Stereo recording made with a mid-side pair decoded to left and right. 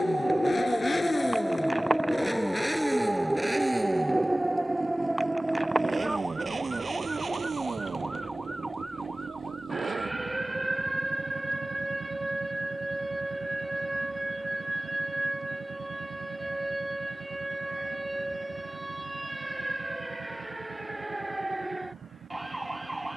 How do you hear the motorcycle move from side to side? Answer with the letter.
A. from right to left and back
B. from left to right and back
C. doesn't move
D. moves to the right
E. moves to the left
D.